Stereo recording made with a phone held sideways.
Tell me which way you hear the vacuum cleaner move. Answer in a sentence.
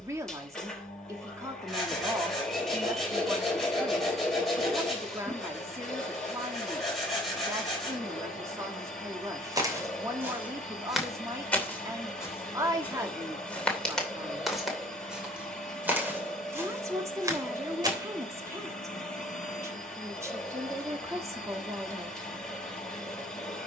In this clip you hear the vacuum cleaner stay put.